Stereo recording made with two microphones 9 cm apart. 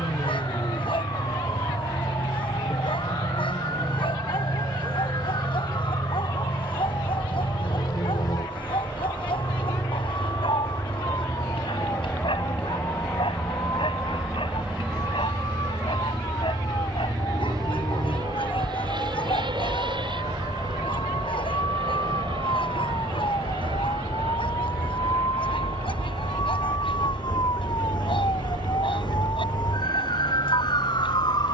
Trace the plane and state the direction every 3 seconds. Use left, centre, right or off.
left, left, left, left, centre, right, right, right, right, right, right.